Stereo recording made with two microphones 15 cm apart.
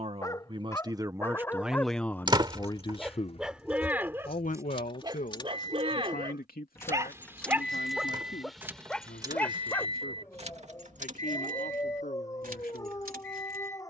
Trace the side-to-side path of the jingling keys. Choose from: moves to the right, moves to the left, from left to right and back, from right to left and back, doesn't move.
moves to the right.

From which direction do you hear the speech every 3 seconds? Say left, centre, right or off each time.
centre, left, left, left, left.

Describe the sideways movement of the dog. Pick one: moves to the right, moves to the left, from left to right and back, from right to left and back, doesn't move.
from left to right and back.